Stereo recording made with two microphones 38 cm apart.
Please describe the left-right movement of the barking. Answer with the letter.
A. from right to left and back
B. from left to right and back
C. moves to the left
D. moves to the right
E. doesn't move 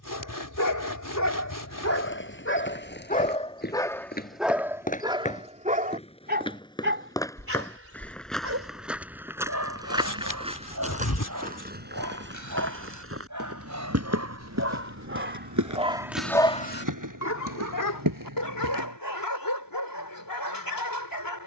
B.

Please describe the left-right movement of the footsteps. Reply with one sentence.
In this clip you hear the footsteps go from the left side to the right.